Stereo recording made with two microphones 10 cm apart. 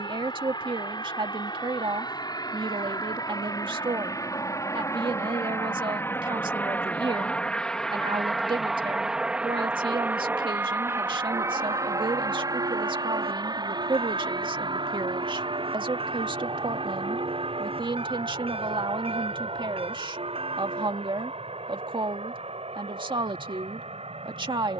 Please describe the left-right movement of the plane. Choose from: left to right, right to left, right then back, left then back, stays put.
left to right.